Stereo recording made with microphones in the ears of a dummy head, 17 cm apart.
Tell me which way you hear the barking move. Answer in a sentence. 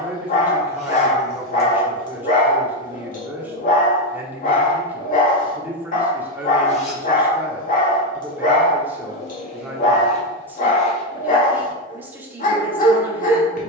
You can hear the barking stay in one place.